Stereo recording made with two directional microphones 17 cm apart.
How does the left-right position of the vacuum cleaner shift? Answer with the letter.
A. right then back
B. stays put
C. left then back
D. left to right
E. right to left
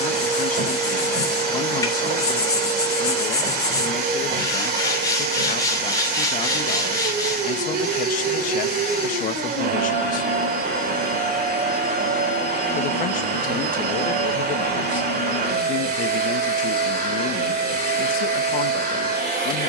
B.